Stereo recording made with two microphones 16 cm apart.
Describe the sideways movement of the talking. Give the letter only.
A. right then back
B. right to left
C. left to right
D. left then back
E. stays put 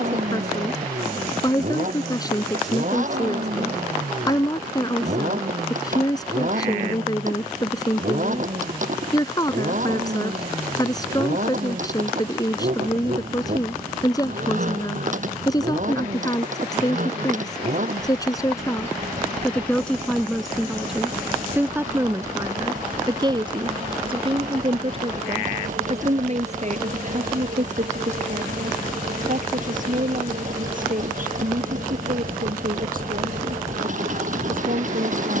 C.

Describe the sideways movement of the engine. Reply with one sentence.
You can hear the engine stay in one place.